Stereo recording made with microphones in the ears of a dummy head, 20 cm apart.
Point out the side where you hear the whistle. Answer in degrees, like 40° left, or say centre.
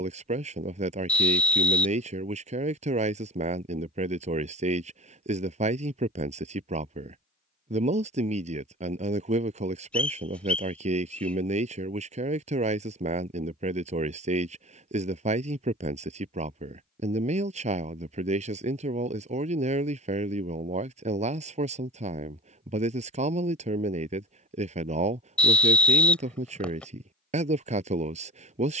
10° left.